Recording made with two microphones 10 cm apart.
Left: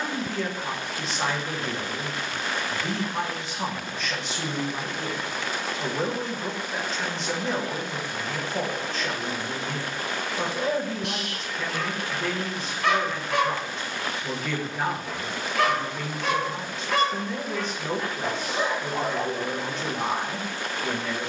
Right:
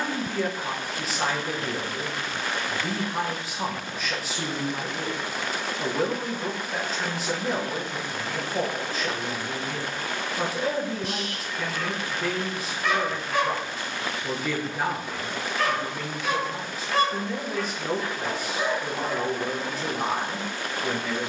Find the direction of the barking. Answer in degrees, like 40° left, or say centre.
70° left.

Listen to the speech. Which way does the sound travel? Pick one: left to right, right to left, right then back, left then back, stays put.
stays put.